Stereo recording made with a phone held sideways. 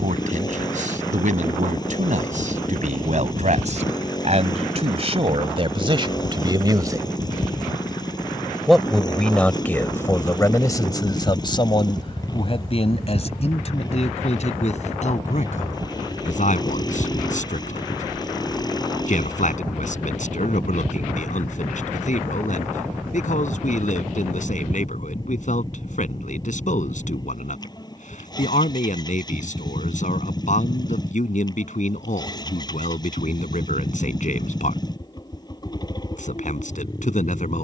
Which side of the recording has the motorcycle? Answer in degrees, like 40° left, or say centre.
30° left.